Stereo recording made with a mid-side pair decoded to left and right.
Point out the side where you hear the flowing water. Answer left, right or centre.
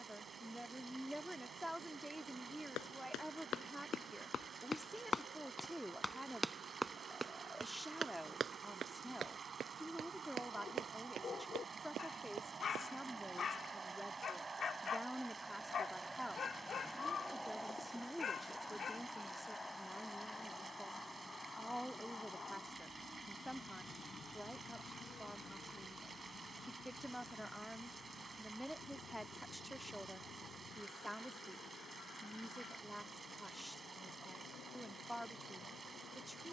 right.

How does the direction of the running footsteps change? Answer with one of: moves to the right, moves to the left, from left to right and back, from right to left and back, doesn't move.
moves to the right.